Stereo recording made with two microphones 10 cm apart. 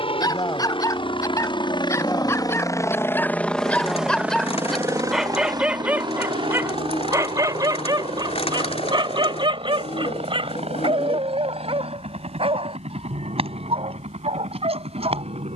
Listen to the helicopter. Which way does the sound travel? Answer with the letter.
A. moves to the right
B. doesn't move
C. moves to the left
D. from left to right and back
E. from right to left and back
A.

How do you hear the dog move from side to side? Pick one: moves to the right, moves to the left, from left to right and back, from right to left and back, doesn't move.
moves to the right.